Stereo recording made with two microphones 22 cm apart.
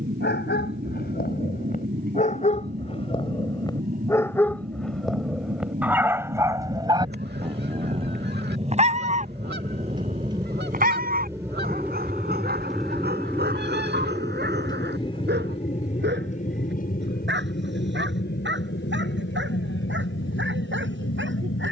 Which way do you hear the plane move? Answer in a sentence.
You can hear the plane go from the right side to the left.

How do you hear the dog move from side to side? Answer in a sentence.
You can hear the dog move from left to right.